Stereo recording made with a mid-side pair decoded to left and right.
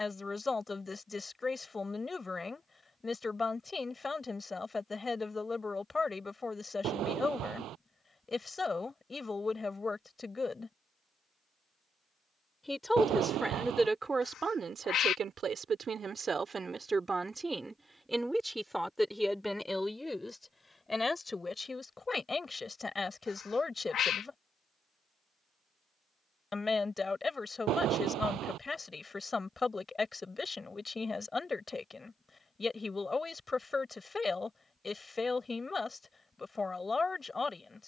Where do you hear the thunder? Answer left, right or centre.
right.